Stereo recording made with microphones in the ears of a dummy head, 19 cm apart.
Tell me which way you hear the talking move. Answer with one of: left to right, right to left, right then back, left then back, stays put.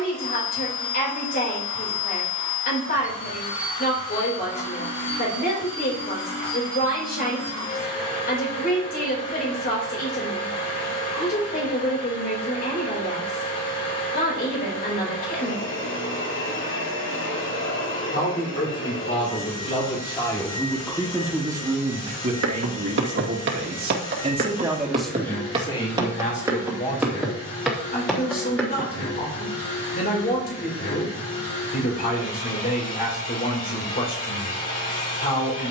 right then back.